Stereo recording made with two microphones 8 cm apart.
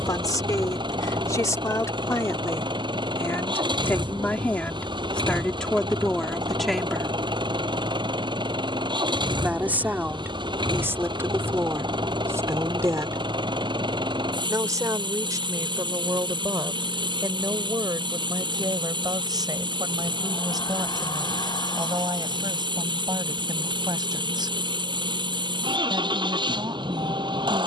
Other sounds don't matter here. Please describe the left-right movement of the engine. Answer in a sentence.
In this clip you hear the engine stay in one place.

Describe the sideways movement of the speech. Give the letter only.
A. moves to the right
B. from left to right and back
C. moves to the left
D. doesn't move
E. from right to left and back
A.